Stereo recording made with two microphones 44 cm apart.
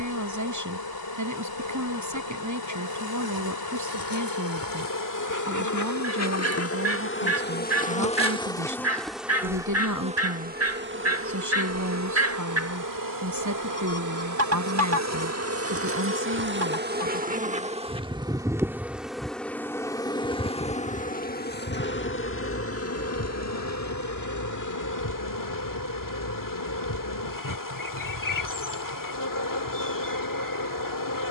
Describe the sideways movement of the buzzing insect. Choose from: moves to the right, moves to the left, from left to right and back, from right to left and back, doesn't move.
from left to right and back.